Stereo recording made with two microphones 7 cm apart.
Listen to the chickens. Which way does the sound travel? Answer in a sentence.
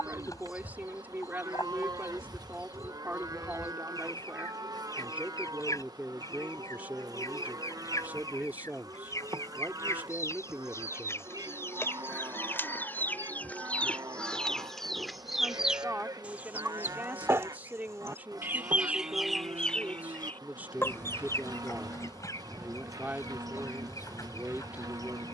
You can hear the chickens go right and come back.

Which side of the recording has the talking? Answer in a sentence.
You can hear the talking on the right.